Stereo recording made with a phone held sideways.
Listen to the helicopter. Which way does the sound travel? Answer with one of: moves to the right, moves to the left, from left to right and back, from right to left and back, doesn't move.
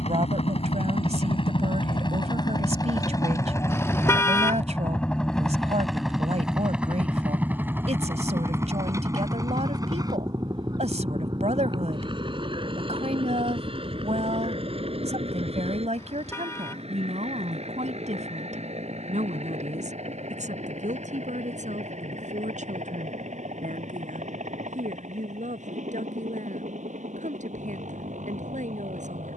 moves to the right.